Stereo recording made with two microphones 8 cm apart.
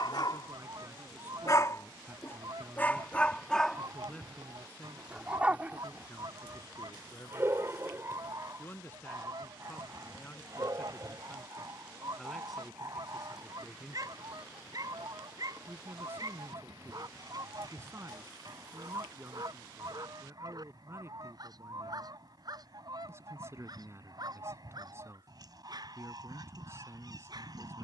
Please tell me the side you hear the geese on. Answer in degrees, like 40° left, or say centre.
60° right.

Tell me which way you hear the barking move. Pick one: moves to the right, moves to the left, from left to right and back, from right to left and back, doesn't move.
moves to the right.